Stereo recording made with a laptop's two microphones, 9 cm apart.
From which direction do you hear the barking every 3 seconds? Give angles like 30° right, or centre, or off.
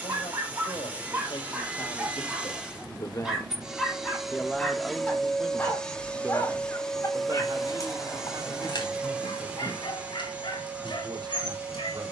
20° right, 10° left, 40° left, 60° left.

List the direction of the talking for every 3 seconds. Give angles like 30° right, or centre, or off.
60° left, 10° left, 40° right, 60° right.